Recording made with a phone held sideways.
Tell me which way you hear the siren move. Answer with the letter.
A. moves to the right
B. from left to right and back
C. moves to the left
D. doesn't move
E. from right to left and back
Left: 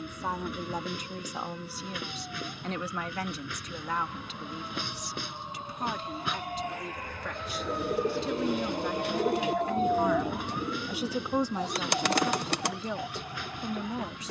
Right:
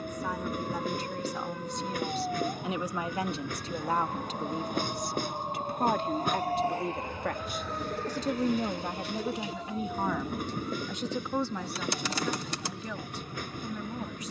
C.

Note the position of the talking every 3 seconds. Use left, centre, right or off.
centre, right, right, centre, left.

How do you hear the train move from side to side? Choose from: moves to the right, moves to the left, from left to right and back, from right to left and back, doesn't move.
doesn't move.